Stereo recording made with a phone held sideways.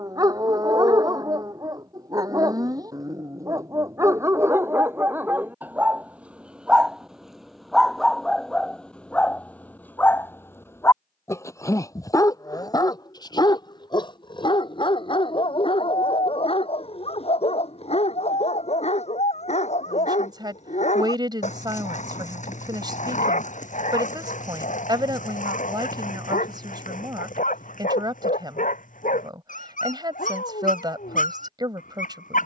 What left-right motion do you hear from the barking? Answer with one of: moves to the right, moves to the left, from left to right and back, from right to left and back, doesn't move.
moves to the left.